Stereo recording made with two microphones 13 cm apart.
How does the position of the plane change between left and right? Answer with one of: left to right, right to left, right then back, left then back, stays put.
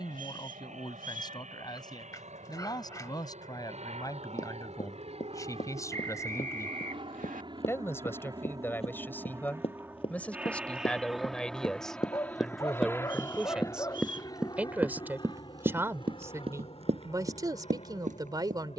right to left.